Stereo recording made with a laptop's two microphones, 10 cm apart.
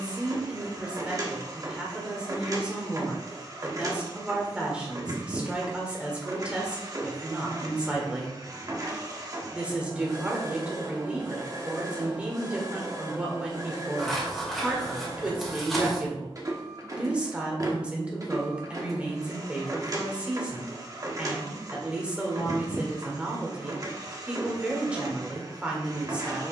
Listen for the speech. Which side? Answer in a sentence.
In this clip you hear the speech in the centre.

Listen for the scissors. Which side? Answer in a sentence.
In this clip you hear the scissors in the centre.